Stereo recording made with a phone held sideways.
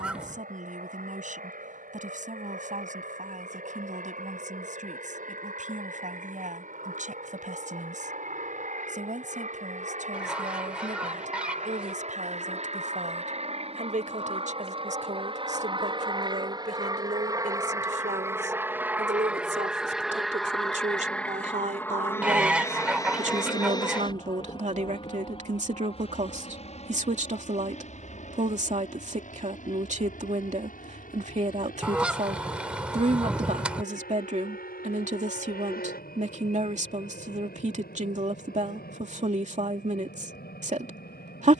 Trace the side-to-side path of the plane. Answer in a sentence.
You can hear the plane move to the left.